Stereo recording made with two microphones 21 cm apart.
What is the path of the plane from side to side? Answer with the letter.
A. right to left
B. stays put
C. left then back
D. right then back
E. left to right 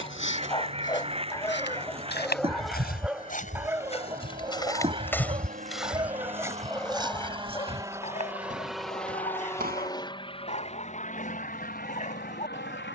A.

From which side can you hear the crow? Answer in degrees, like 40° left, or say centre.
30° right.